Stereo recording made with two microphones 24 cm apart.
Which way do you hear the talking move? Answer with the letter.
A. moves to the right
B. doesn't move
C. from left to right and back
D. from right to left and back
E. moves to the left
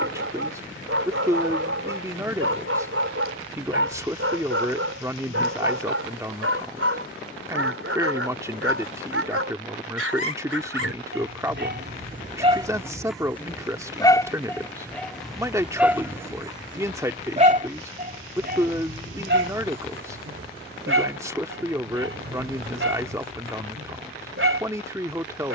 B.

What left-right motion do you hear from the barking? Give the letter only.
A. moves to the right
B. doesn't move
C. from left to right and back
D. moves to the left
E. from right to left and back
E.